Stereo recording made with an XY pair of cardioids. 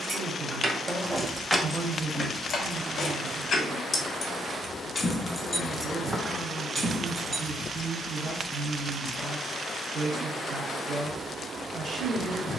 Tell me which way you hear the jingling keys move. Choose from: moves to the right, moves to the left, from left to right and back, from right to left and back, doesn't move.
from right to left and back.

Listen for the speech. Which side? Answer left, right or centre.
right.